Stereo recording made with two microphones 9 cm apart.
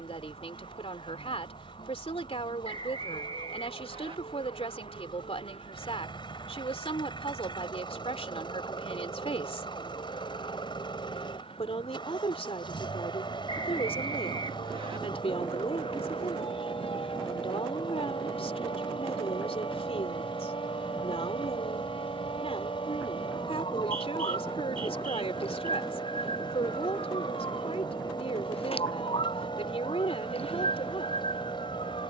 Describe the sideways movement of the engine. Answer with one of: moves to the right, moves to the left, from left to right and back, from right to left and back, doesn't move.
doesn't move.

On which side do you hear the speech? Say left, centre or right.
left.